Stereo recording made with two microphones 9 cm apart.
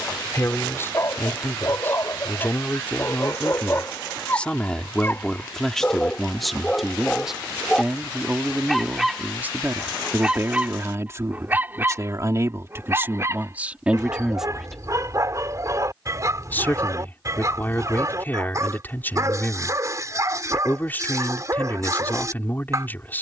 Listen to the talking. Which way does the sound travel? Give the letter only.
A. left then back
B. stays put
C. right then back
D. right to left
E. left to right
C.